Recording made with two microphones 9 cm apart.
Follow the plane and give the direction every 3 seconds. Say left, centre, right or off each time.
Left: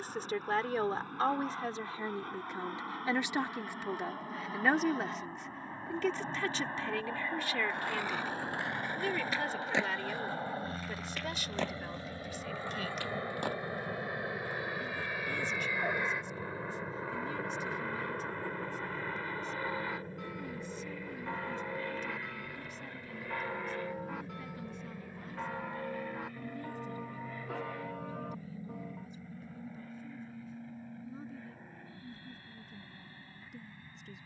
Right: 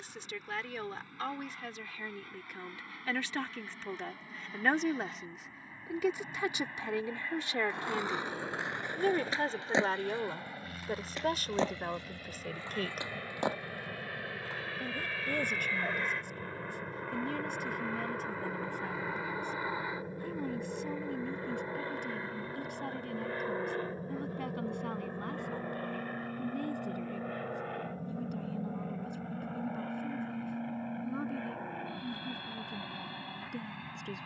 left, left, left, left, left, centre, centre, right, right, right, right, right.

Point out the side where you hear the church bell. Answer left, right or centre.
left.